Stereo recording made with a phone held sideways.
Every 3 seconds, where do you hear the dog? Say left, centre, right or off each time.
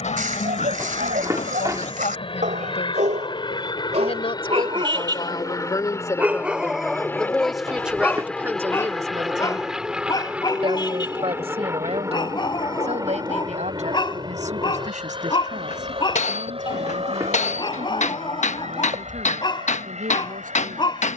right, right, centre, left, left, left, left.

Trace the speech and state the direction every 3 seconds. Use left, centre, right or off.
left, left, centre, right, right, right, right.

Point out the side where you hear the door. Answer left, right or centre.
right.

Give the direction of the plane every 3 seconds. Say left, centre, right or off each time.
left, left, centre, centre, right, right, right.